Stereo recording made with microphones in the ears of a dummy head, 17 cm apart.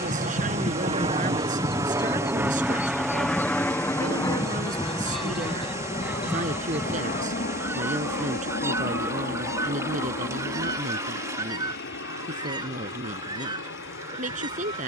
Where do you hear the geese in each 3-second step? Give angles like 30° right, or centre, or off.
30° left, centre, 10° right, 20° right, 20° right.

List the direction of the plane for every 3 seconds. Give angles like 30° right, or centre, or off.
20° right, 20° left, 40° left, 60° left, 60° left.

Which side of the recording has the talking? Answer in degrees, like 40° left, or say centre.
40° right.